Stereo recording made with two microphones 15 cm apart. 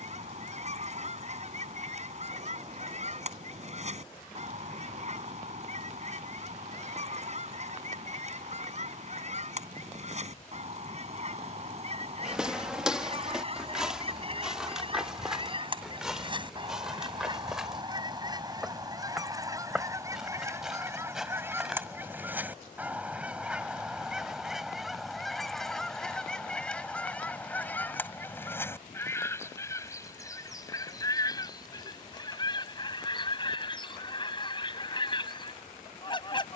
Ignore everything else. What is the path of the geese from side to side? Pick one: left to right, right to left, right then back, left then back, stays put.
right to left.